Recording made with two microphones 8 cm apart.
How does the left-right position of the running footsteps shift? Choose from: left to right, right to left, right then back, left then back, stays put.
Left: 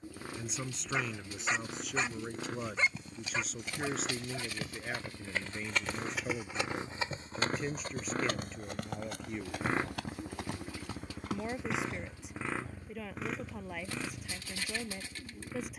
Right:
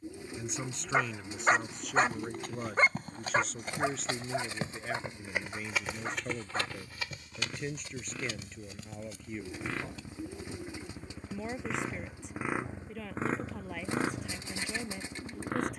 right to left.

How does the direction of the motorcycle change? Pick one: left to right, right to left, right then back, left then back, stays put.
left to right.